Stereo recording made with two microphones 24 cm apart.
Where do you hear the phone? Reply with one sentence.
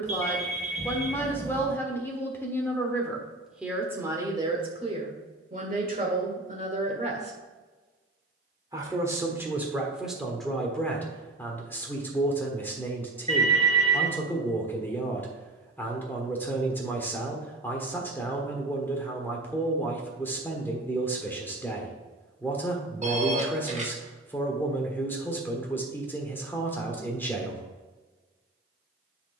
In this clip you hear the phone on the right.